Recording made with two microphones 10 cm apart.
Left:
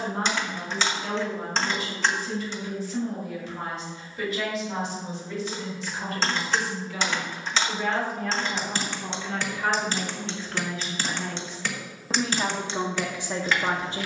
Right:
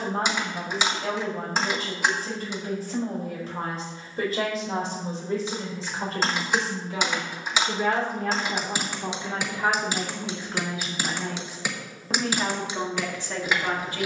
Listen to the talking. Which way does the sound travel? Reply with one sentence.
In this clip you hear the talking move to the left.